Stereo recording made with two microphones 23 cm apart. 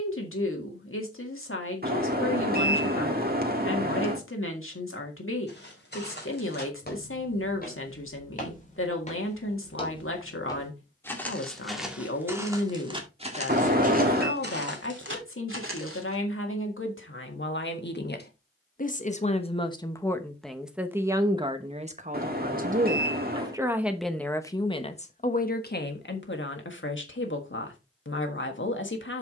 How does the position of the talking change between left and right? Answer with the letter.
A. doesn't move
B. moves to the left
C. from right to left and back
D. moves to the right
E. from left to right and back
E.